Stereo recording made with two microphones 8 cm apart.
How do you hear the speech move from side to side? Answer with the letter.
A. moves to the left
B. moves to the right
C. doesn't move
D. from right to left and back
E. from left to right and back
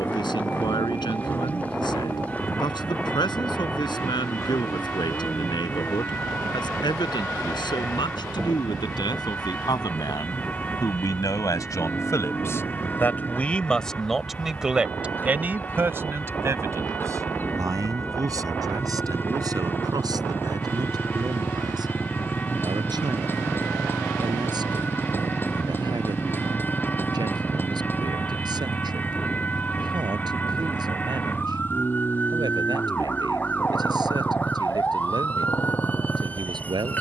B.